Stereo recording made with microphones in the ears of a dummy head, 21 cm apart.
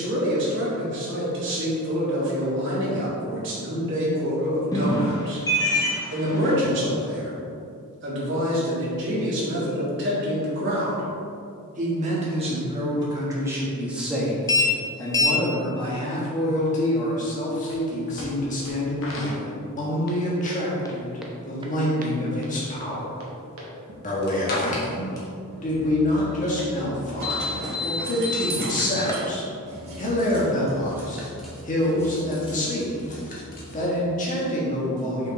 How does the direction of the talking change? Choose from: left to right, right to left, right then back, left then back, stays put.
right to left.